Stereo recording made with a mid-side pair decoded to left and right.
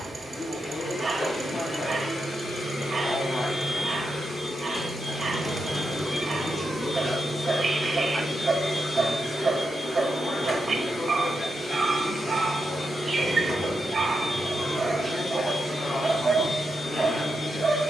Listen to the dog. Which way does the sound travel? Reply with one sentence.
In this clip you hear the dog stay in one place.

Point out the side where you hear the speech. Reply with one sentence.
In this clip you hear the speech on the left.